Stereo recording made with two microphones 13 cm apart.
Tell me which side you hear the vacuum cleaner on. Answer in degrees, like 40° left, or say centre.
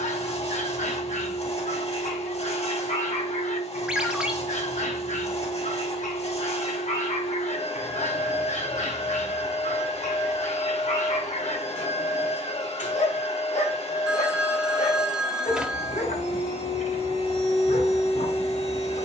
50° left.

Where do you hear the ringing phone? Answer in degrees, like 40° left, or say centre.
10° right.